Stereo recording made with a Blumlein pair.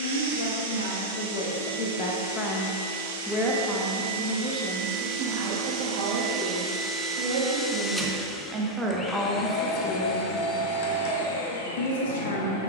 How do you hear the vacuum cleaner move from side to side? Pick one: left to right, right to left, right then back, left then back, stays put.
right to left.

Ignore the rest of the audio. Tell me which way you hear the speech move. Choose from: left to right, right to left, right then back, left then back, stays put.
right then back.